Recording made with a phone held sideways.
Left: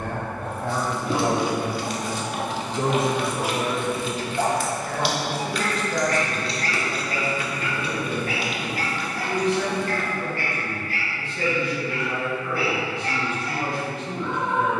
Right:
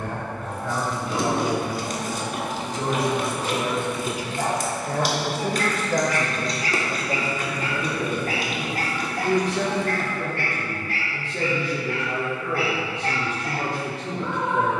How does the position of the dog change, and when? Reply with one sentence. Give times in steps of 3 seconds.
In this clip you hear the dog on the left from 0 s and on the right from 6 s.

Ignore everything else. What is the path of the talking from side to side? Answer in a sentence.
In this clip you hear the talking move from left to right.